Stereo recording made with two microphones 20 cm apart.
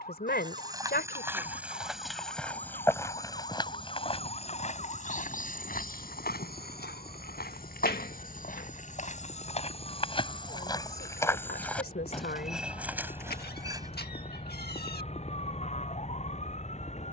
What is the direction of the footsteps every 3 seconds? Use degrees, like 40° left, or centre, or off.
10° right, 30° left, 50° left, 20° left, 10° right, off.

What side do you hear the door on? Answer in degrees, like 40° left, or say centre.
50° left.